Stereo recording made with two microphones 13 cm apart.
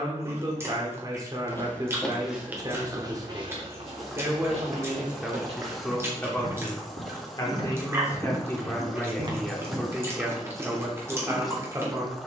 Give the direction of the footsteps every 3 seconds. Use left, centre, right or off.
centre, right, right, right.